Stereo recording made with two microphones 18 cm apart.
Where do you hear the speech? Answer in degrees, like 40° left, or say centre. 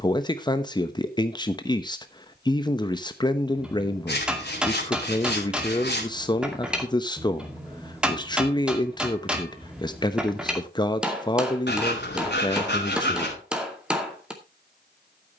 20° left.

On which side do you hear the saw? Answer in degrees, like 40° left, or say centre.
70° left.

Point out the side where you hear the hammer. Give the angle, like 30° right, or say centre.
10° right.